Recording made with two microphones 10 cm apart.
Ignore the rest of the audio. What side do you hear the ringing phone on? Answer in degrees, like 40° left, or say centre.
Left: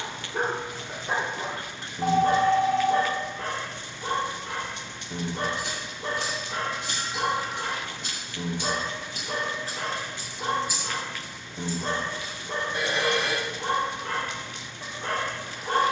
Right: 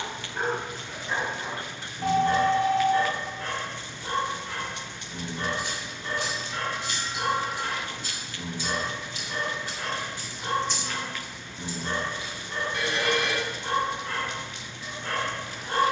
30° left.